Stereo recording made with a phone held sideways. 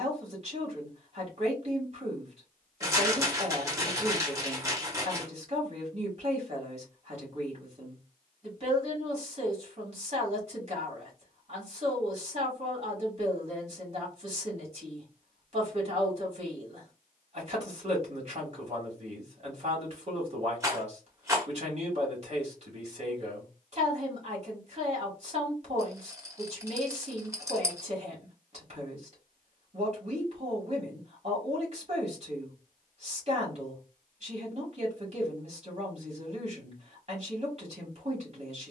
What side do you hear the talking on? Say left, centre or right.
right.